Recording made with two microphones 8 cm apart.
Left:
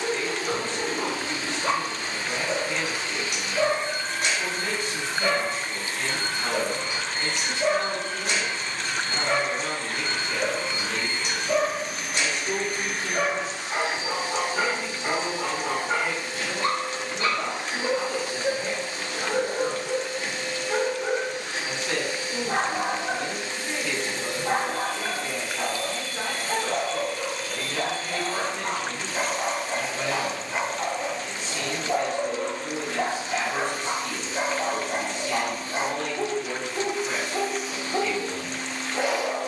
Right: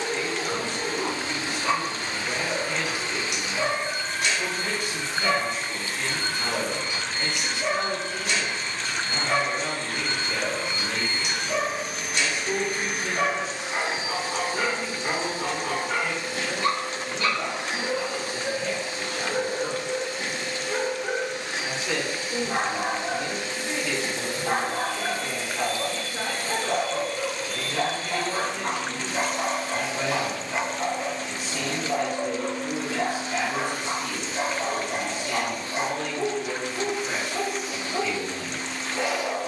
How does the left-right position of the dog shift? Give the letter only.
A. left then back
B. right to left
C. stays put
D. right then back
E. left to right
D.